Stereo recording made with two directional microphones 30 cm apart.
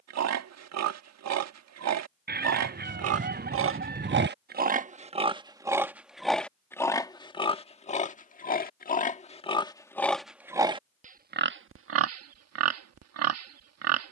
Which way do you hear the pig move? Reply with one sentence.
You can hear the pig move from right to left and back again.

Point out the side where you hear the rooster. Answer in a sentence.
In this clip you hear the rooster on the right.